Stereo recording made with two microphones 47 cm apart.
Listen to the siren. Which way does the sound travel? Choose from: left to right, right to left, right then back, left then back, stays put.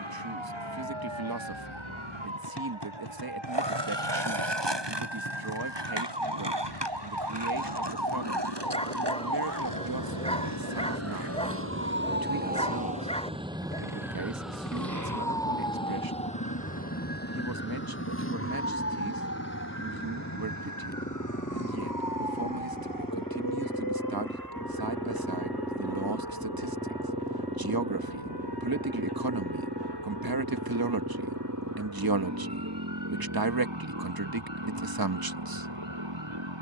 right to left.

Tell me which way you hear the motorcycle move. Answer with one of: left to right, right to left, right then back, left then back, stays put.
left to right.